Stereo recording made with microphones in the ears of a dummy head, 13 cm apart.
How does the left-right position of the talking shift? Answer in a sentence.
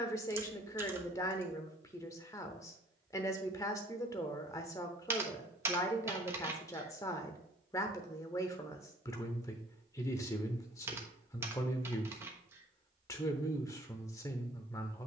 You can hear the talking stay in one place.